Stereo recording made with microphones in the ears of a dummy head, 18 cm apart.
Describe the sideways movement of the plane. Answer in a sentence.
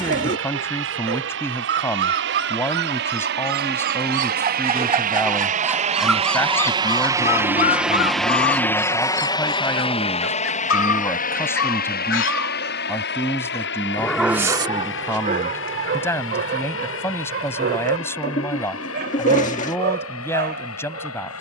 You can hear the plane travel towards the left.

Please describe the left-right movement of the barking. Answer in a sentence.
In this clip you hear the barking go left and come back.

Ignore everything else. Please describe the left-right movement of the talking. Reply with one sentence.
In this clip you hear the talking stay put.